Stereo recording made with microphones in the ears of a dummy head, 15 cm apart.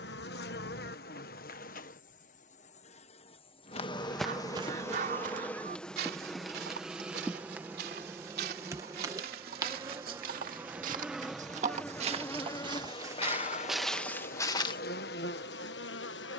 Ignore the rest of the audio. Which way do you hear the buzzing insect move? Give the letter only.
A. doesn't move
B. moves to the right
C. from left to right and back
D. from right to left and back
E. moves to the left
C.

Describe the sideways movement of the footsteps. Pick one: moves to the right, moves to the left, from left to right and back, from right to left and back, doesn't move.
from left to right and back.